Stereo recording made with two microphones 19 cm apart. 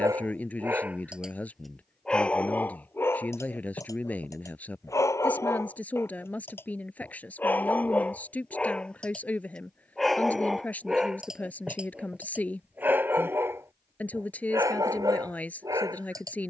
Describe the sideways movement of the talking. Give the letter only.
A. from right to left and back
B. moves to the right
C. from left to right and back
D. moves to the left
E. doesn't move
E.